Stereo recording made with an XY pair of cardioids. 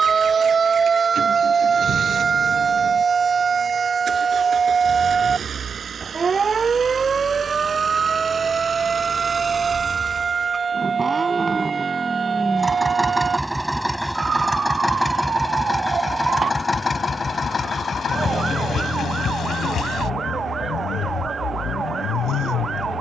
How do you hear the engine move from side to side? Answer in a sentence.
In this clip you hear the engine travel towards the left.